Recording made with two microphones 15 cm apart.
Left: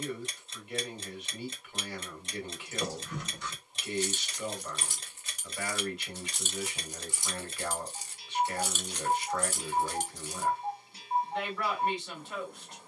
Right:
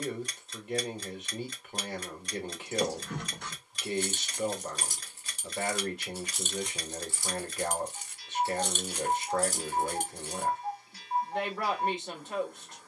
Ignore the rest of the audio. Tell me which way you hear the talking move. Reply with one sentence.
You can hear the talking stay put.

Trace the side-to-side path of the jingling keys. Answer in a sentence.
You can hear the jingling keys go left and come back.